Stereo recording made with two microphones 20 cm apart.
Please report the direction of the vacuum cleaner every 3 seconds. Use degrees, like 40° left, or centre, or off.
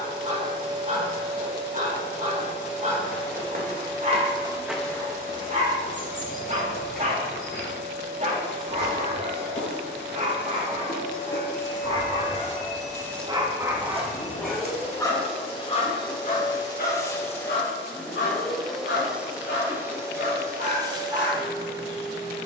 20° right, 30° left, 60° left, 60° left, 40° left, 20° left, 10° right, 20° right.